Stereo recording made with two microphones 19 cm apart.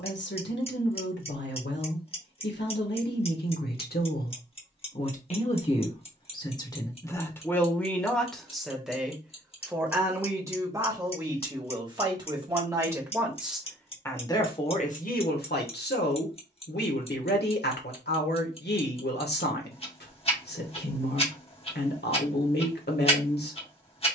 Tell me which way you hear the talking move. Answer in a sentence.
In this clip you hear the talking move from left to right and back again.